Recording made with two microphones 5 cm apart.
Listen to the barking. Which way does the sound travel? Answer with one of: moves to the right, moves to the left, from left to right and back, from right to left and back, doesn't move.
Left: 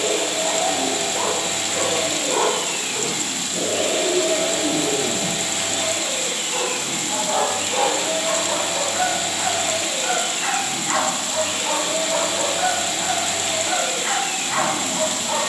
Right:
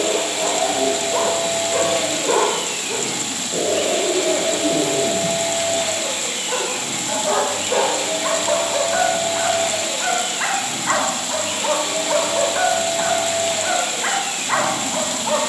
doesn't move.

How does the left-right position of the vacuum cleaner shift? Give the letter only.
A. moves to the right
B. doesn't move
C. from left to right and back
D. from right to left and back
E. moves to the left
B.